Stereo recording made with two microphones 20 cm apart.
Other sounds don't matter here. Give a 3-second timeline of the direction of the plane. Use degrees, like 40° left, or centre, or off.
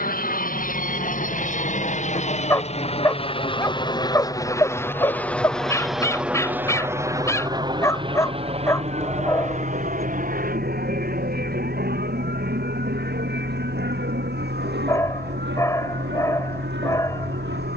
50° left, 20° left, 20° right, 40° right, 60° right, 60° right.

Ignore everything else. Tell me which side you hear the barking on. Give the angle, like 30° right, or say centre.
20° left.